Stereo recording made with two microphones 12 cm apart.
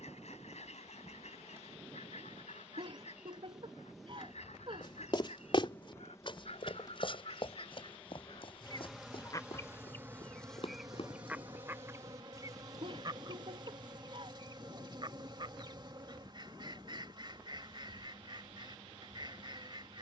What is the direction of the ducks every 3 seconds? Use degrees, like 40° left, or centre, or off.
70° left, 70° left, 50° left, 10° left, 40° right, 40° right, 40° right.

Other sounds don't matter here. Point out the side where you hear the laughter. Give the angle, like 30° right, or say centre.
50° right.